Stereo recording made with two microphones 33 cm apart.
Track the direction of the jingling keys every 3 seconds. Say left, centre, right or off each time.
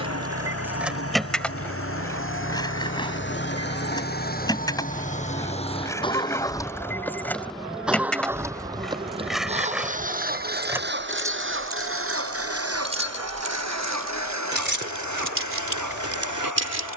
centre, centre, centre, centre, right, right.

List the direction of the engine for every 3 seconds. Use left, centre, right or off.
left, left, centre, right, right, right.